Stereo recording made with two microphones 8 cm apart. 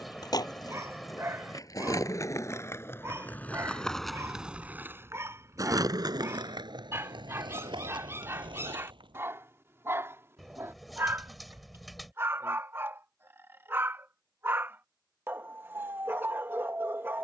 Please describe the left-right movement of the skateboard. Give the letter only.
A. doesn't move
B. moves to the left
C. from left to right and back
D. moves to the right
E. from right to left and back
D.